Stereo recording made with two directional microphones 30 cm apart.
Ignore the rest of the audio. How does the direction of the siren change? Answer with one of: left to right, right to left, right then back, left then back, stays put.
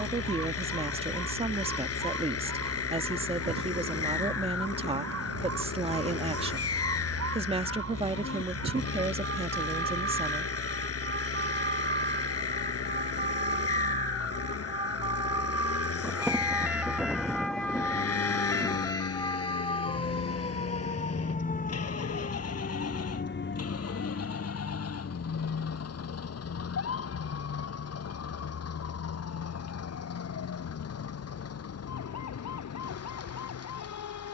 right to left.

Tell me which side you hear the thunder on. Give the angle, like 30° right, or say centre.
centre.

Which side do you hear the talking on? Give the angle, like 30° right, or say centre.
20° right.